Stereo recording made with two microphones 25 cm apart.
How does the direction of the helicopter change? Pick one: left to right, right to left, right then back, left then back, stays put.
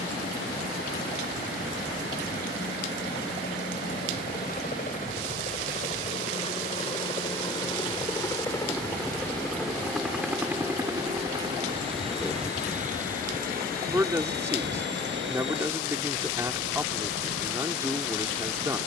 left to right.